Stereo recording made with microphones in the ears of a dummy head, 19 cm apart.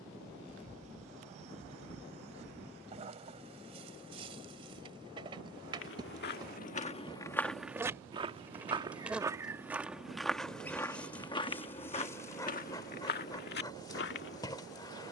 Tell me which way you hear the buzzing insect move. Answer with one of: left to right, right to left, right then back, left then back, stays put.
right to left.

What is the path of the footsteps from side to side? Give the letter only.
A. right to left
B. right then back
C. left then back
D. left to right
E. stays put
B.